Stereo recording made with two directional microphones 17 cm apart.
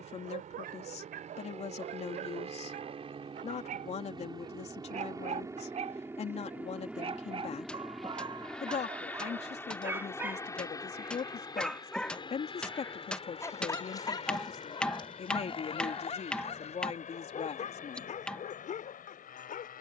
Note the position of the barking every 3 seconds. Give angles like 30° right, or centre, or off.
60° right, 50° right, 30° right, 10° right, 20° left, 40° left, 50° left.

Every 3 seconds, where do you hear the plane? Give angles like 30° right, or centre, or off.
40° right, 20° right, centre, 20° left, 30° left, 40° left, 50° left.